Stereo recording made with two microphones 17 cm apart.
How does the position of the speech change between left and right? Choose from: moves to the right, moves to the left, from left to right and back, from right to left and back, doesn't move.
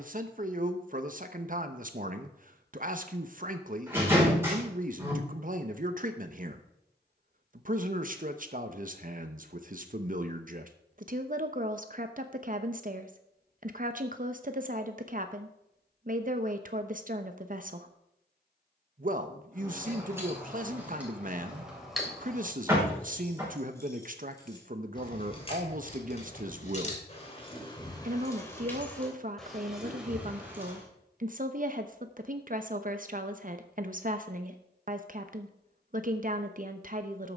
doesn't move.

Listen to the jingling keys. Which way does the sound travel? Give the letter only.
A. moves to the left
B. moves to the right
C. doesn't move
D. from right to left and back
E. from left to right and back
D.